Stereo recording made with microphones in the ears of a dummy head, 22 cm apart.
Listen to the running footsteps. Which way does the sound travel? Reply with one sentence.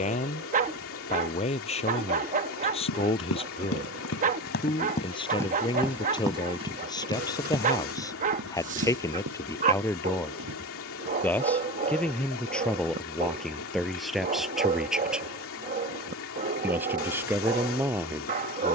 In this clip you hear the running footsteps move to the right.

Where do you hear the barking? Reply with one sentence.
In this clip you hear the barking on the right.